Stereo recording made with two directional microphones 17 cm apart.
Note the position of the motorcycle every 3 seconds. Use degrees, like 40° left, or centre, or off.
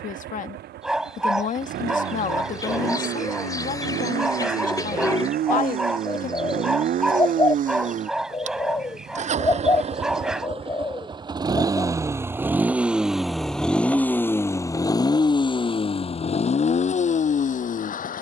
70° right, 60° right, 50° right, 30° right, centre, 40° left.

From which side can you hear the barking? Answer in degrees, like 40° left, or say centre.
centre.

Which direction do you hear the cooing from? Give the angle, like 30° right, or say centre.
20° left.